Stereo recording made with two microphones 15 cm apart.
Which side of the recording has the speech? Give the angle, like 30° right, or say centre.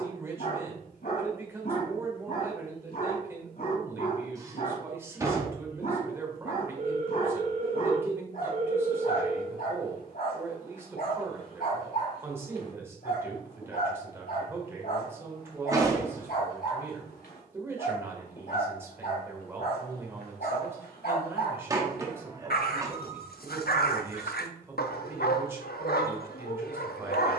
20° right.